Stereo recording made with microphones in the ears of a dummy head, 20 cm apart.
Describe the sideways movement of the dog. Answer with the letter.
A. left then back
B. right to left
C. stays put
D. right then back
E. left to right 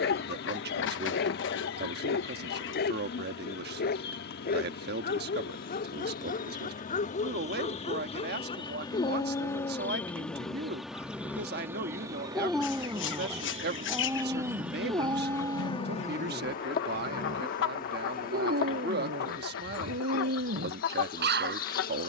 E.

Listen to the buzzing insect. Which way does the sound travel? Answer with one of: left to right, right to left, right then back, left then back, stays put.
right then back.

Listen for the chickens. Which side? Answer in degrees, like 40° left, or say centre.
60° left.